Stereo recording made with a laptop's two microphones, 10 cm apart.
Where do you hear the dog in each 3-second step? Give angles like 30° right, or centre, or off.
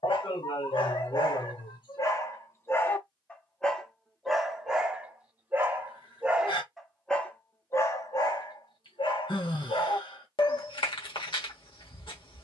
40° left, 10° right, 20° left, 60° left.